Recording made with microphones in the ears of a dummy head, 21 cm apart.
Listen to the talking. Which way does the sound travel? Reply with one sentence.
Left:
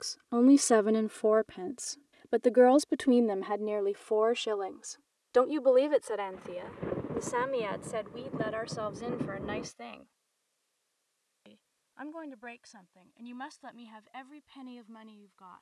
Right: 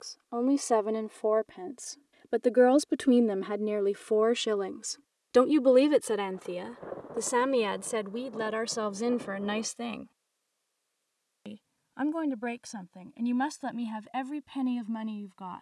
You can hear the talking move from left to right.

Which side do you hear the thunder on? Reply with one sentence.
You can hear the thunder on the left.